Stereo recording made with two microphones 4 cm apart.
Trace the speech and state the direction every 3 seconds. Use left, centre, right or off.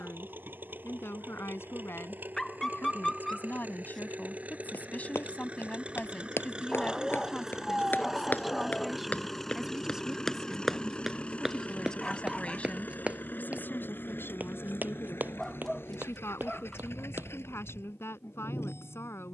left, left, centre, centre, left, left, left.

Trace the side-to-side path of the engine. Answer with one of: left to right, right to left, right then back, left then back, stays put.
right to left.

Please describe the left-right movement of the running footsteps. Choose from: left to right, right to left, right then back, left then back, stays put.
left to right.